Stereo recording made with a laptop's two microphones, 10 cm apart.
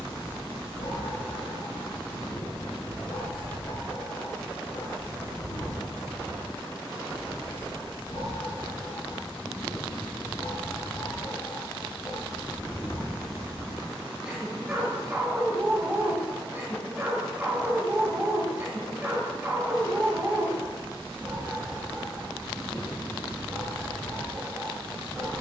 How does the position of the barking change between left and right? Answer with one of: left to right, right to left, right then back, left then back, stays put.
left to right.